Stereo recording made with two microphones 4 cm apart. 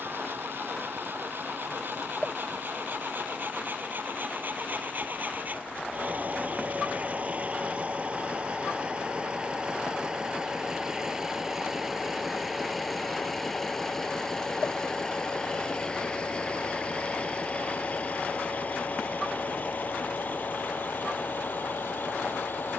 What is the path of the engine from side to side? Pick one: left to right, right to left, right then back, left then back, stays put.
right to left.